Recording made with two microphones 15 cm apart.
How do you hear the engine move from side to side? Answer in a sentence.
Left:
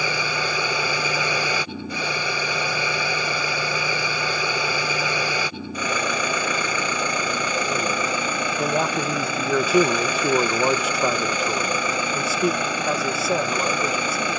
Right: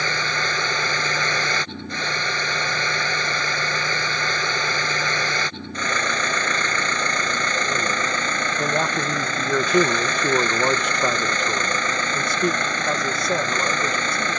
You can hear the engine stay put.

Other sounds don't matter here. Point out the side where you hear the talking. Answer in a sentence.
In this clip you hear the talking in the centre.